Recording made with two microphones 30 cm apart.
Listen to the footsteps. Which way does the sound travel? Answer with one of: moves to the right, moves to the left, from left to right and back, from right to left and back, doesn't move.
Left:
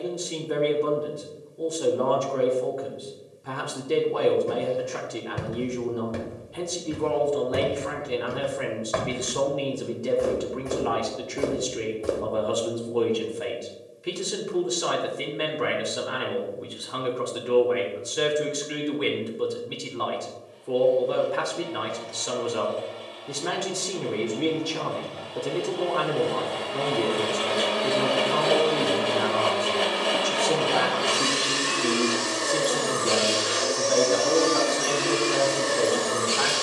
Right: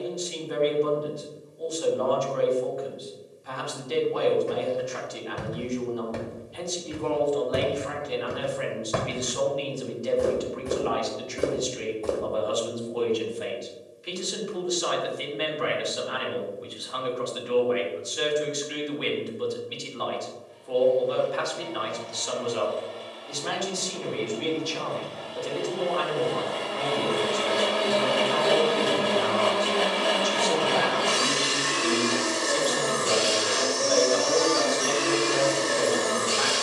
from left to right and back.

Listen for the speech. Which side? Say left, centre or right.
left.